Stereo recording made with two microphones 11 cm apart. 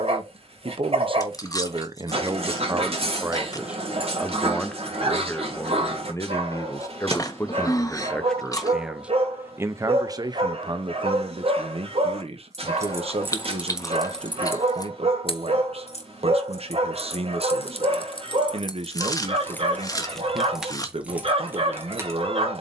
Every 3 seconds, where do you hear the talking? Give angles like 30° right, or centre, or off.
50° right, 10° left, 20° left, 40° right, 60° right, 60° right, 60° right, 60° right.